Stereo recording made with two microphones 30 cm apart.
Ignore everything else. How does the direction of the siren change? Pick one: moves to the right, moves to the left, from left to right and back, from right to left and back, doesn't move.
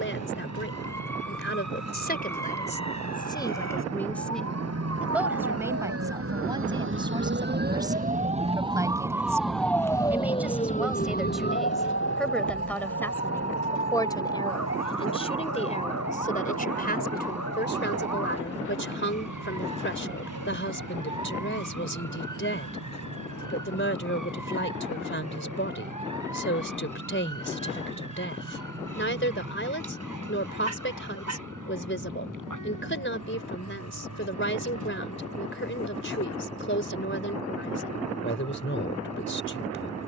moves to the left.